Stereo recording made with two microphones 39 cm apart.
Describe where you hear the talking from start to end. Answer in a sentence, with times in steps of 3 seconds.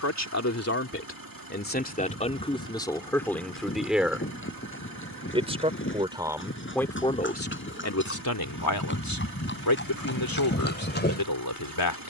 In this clip you hear the talking on the left from 0 s, in the centre from 3 s and on the left from 6 s.